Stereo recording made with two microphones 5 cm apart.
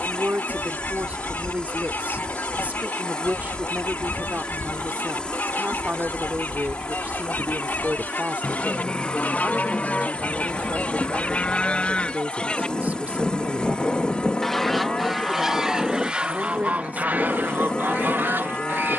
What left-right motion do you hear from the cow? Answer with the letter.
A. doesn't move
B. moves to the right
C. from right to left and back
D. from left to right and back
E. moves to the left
A.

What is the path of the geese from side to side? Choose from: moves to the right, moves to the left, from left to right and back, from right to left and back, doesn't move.
moves to the right.